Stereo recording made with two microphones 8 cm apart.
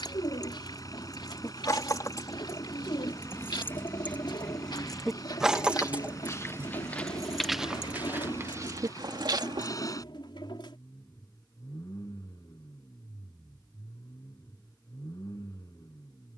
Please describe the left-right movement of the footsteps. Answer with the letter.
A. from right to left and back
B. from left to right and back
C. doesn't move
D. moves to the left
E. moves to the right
E.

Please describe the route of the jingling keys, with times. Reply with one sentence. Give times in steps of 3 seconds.
You can hear the jingling keys on the left from 0 s, in the centre from 3 s, on the right from 6 s and not at all from 12 s.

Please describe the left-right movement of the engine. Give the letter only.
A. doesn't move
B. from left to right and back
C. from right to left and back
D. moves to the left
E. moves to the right
A.